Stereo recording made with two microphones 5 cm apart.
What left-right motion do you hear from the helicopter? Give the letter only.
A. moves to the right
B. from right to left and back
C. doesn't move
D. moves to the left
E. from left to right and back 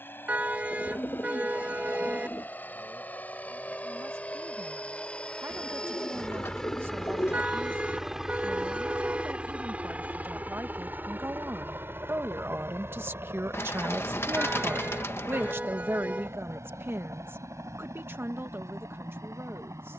A.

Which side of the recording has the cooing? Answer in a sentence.
In this clip you hear the cooing on the left.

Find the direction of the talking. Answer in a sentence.
You can hear the talking on the right.